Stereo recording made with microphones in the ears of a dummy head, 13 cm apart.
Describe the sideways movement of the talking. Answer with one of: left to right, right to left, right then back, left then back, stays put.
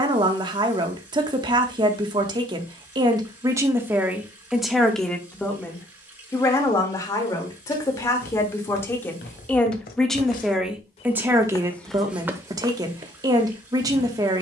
left then back.